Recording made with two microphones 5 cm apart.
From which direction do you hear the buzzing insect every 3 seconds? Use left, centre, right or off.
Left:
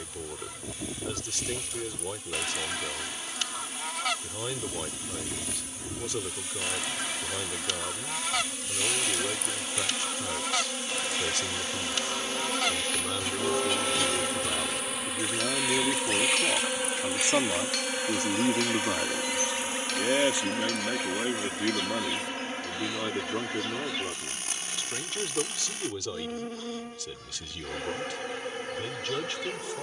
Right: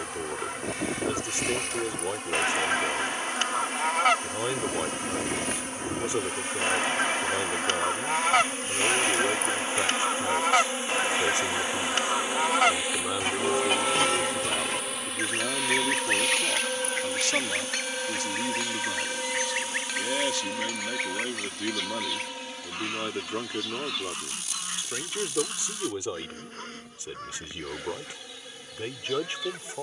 right, right, right, right, centre, centre, left, left, left, left.